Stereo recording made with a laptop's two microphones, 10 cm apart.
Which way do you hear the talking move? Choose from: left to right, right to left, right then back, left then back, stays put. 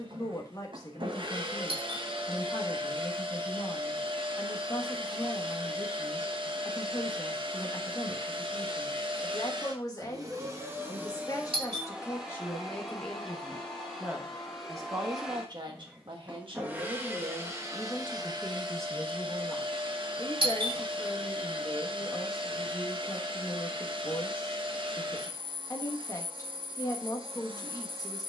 right then back.